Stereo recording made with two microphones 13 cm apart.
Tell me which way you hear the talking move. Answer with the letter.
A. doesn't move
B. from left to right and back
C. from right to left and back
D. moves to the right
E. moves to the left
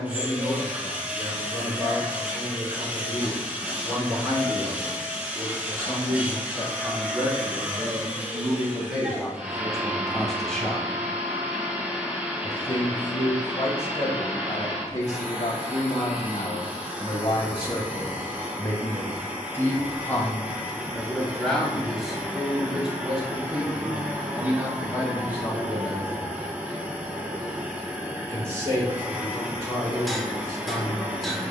C.